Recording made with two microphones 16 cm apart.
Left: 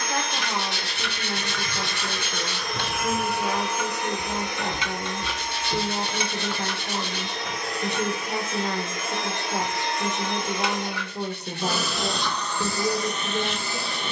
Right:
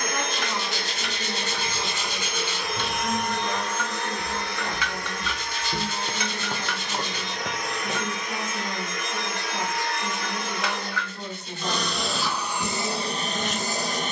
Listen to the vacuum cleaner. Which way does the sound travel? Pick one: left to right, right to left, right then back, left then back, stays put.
left then back.